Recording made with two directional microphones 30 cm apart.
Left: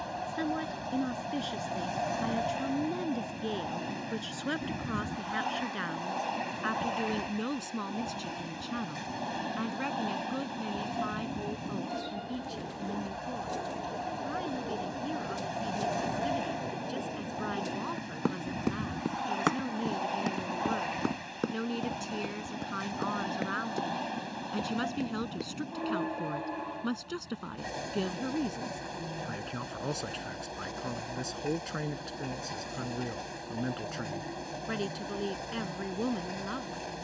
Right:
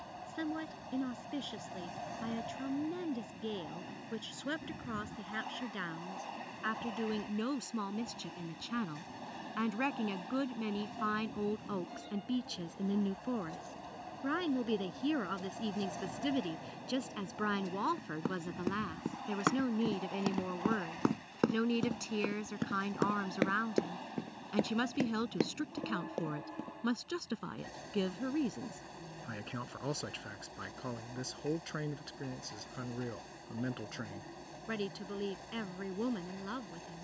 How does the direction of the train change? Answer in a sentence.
In this clip you hear the train stay in one place.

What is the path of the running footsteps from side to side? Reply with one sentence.
You can hear the running footsteps travel towards the right.